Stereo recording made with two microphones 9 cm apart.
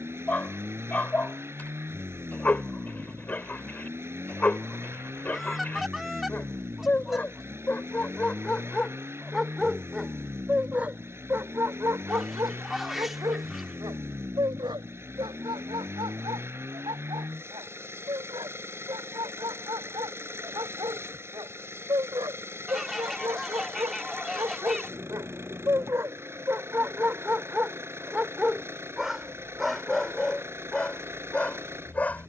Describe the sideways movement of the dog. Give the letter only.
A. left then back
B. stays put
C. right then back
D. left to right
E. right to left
C.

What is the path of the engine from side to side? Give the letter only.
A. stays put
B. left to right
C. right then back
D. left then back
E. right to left
A.